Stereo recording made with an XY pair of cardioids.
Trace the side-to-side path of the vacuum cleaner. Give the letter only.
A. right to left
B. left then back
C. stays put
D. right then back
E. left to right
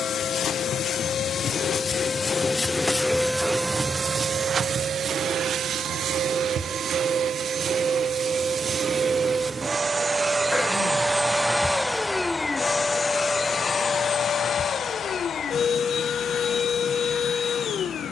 D.